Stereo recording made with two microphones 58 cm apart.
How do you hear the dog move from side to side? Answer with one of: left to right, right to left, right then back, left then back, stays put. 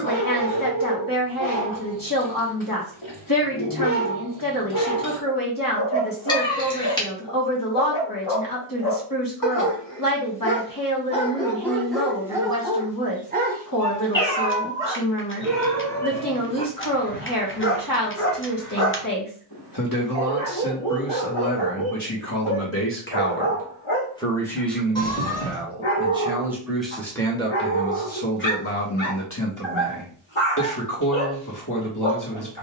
right then back.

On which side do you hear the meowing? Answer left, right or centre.
centre.